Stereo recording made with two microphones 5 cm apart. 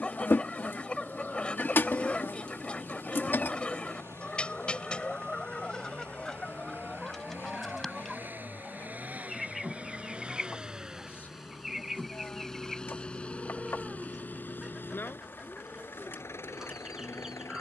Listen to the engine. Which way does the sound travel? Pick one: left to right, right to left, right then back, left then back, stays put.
right to left.